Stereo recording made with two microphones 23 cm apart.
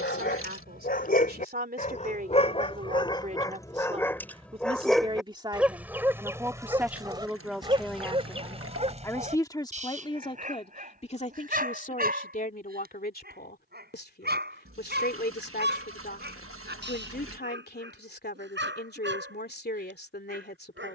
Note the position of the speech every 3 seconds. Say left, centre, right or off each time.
right, right, centre, left, left, left, left.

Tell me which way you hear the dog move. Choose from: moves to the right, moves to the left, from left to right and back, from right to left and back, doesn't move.
moves to the right.